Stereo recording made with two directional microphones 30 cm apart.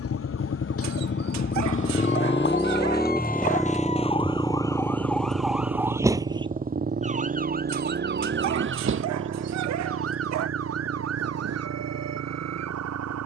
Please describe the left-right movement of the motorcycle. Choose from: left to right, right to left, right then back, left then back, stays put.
left to right.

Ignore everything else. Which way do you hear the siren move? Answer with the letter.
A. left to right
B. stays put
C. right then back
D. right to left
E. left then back
A.